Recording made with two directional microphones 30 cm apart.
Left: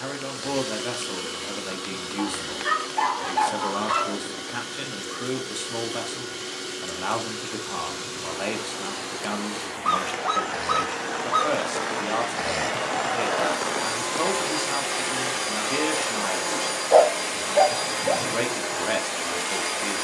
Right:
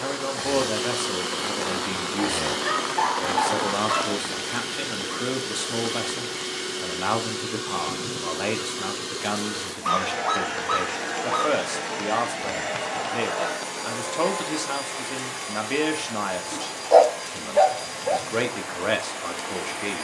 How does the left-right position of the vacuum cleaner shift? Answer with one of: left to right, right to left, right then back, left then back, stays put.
right to left.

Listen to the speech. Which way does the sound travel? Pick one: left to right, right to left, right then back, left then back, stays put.
stays put.